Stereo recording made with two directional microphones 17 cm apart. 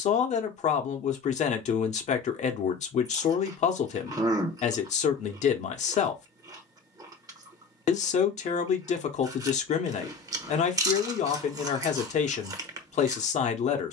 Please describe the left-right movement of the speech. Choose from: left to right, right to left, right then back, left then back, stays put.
stays put.